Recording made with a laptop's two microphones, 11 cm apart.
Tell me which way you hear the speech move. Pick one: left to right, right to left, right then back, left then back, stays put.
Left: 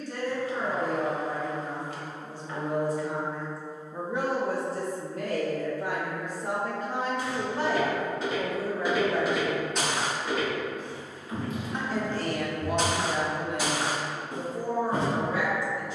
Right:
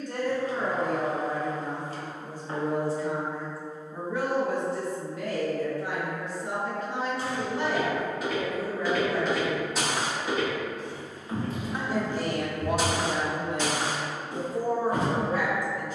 left then back.